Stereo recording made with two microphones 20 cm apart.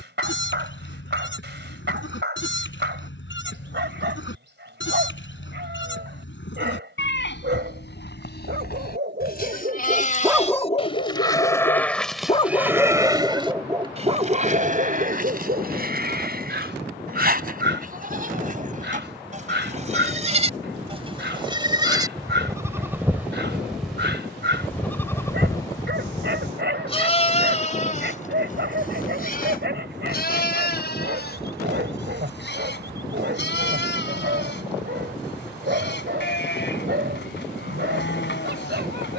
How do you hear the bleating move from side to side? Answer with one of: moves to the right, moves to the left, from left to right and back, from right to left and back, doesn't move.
from left to right and back.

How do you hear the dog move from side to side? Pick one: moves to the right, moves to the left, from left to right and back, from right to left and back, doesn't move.
from right to left and back.